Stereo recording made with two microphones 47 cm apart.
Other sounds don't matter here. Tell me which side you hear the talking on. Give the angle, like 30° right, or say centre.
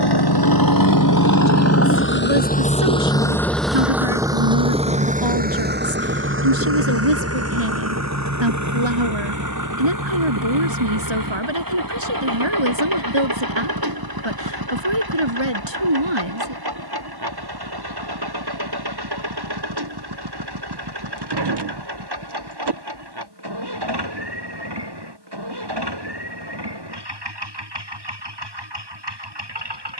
70° right.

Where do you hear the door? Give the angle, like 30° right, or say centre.
60° right.